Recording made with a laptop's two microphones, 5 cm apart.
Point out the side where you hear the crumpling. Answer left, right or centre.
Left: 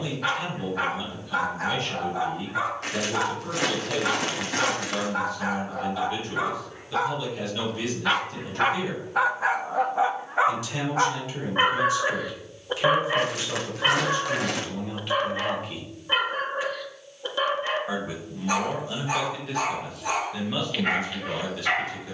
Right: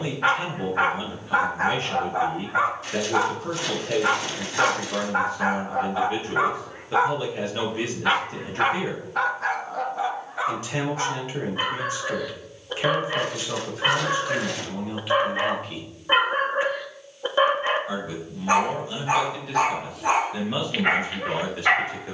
left.